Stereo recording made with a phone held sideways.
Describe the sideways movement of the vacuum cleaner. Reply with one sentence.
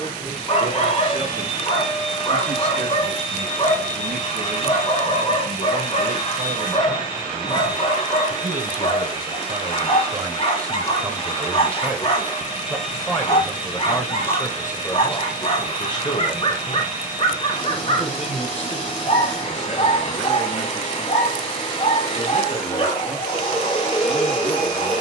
You can hear the vacuum cleaner stay in one place.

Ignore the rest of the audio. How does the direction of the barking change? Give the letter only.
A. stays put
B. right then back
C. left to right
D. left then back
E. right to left
A.